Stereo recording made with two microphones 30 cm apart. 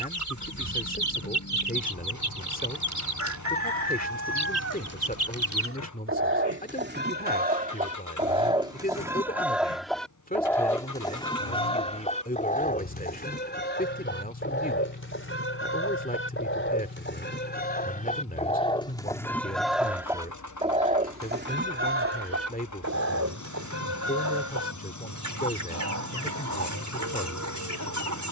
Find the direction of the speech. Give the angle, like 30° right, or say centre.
30° left.